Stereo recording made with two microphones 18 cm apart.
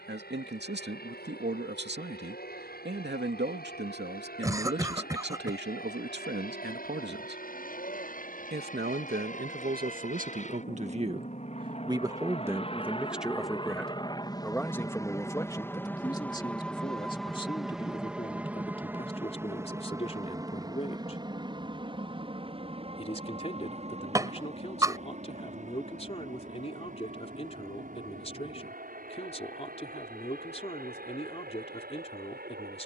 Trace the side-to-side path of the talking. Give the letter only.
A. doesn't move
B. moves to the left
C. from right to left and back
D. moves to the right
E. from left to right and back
B.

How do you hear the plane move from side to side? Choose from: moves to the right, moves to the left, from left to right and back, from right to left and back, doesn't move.
moves to the right.